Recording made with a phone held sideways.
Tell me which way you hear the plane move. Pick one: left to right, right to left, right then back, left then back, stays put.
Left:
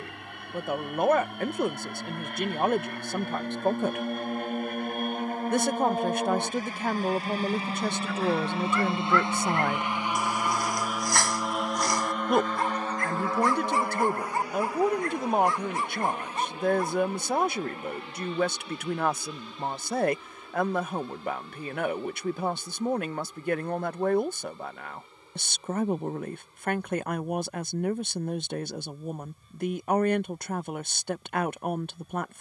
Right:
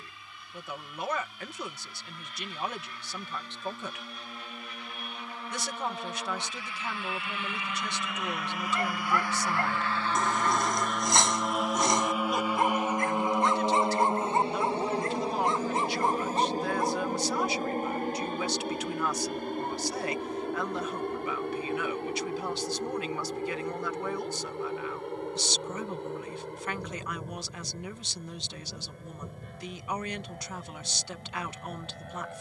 left to right.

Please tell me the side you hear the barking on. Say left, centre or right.
right.